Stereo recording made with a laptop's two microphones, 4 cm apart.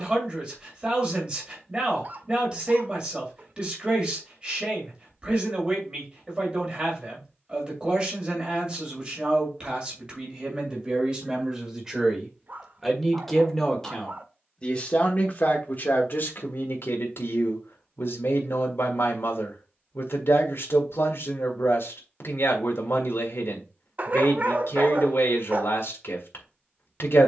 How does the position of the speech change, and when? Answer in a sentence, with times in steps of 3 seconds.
You can hear the speech on the right from 0 s, in the centre from 12 s and on the left from 15 s.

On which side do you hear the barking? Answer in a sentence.
You can hear the barking on the right.